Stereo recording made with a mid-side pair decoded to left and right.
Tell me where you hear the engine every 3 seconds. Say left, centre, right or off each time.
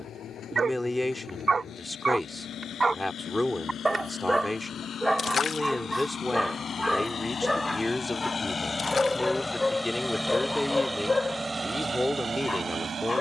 left, left, left, centre, right.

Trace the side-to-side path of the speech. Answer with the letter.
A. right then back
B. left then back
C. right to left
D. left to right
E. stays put
E.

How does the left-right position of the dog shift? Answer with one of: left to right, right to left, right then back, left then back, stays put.
right to left.